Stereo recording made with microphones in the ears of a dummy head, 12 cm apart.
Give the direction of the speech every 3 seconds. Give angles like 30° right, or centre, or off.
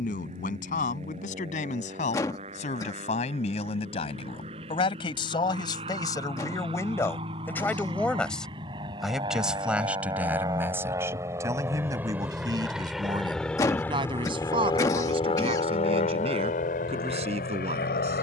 60° left, 40° left, 20° left, 10° right, 30° right, 50° right.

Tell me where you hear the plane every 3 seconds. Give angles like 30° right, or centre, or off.
50° right, 50° right, 40° right, 30° right, 10° left, 60° left.